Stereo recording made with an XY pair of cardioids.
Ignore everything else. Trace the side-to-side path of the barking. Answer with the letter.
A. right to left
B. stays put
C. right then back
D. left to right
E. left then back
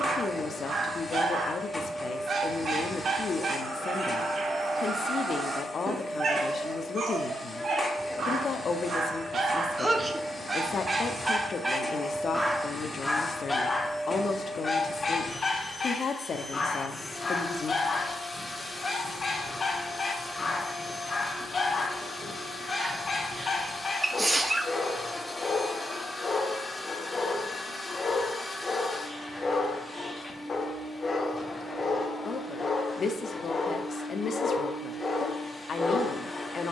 A.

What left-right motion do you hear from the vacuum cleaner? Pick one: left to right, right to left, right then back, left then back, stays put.
stays put.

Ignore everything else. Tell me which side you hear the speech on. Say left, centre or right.
left.